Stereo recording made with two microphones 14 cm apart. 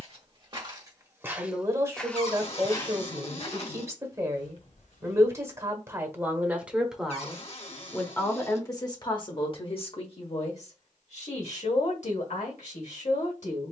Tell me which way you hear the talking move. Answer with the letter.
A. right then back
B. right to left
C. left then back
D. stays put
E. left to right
B.